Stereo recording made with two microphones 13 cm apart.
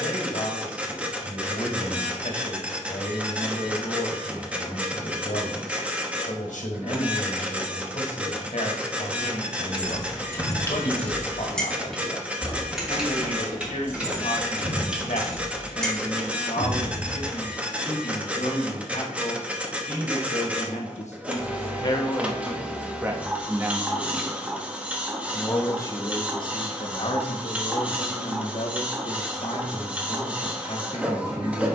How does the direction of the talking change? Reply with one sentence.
You can hear the talking move from left to right and back again.